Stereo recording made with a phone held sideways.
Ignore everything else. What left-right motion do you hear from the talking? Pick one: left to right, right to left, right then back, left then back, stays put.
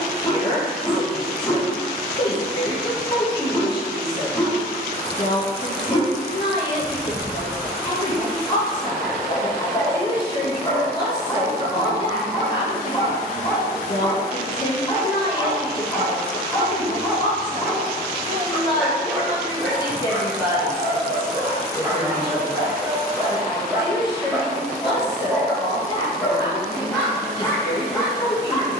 stays put.